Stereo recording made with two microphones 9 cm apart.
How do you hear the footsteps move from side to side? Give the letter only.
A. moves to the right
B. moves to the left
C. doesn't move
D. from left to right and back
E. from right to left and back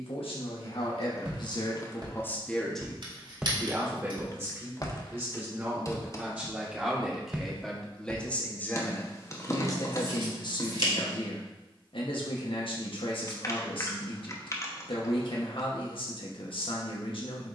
E.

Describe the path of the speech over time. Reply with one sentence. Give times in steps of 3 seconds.
In this clip you hear the speech on the left from 0 s, on the right from 3 s, in the centre from 6 s and on the left from 9 s.